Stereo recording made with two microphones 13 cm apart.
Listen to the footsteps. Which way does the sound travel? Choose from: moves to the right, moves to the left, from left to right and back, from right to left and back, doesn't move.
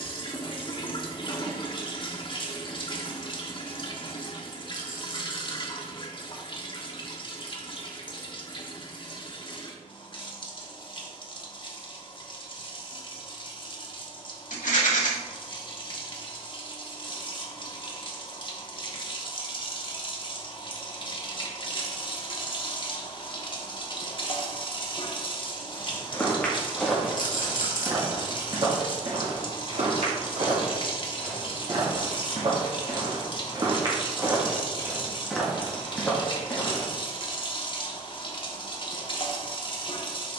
from left to right and back.